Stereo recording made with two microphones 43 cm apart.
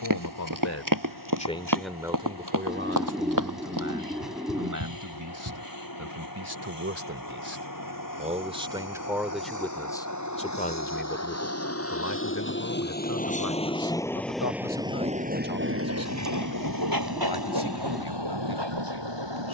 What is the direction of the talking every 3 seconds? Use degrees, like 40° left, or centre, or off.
10° left, 40° right, 30° right, 10° left, 50° left, 60° left, 60° left.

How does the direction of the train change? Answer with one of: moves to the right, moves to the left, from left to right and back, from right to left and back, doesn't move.
moves to the right.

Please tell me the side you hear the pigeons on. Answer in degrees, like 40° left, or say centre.
centre.